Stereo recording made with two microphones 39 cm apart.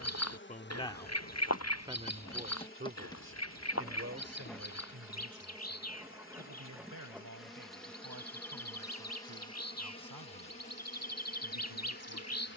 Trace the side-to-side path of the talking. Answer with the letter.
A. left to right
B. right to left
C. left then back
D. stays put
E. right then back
A.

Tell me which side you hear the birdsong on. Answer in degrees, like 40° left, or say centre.
40° left.